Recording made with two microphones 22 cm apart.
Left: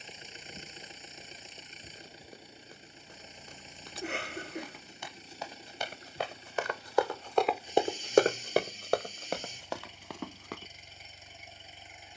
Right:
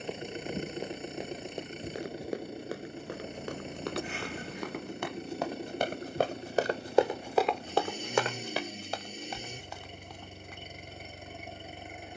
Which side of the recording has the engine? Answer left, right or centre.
right.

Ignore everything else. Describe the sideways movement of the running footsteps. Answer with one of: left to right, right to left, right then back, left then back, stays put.
right to left.